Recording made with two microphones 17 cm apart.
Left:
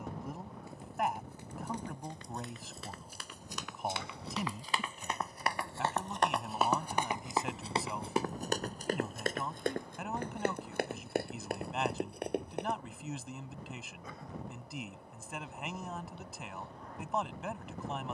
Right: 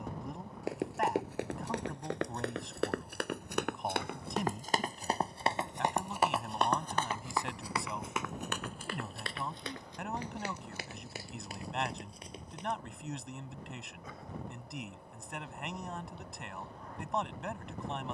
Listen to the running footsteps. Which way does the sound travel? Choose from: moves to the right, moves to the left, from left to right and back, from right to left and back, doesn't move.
moves to the left.